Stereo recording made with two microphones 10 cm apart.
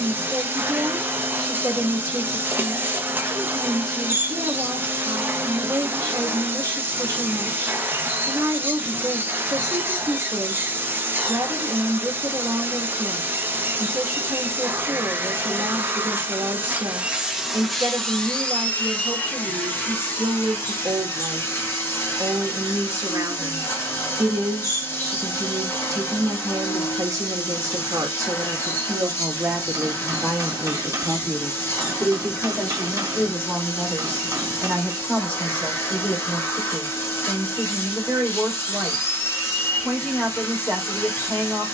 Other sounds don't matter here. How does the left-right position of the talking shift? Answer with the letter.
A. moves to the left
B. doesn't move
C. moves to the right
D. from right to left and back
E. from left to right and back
A.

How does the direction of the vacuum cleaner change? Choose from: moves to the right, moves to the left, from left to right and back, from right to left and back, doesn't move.
moves to the left.